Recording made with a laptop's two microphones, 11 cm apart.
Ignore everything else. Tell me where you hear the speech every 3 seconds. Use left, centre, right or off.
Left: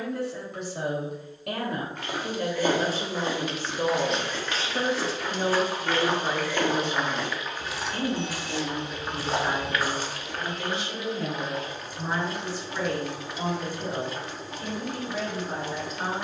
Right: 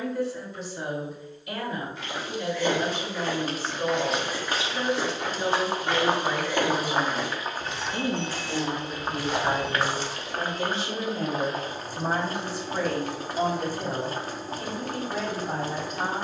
left, left, centre, right, right, right.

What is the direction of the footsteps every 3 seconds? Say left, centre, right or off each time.
left, centre, centre, left, off, off.